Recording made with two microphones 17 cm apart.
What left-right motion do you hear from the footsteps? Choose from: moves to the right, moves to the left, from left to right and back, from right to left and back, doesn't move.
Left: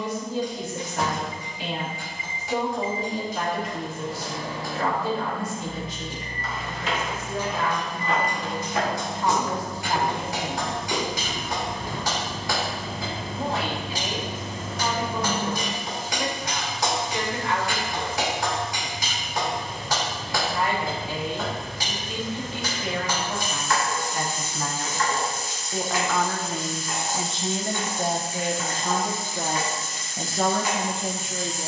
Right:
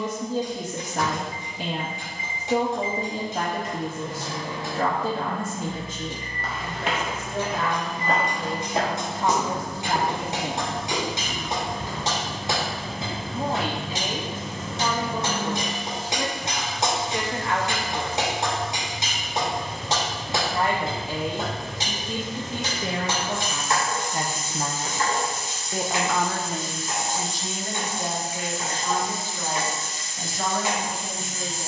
moves to the left.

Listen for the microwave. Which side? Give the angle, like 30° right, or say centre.
30° left.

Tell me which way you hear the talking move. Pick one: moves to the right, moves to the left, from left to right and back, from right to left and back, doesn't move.
moves to the left.